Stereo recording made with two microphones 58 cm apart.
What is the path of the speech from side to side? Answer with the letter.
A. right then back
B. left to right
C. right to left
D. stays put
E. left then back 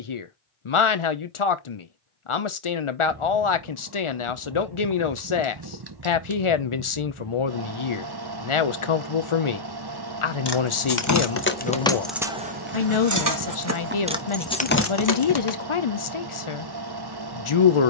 D.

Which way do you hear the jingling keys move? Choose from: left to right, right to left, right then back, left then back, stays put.
right then back.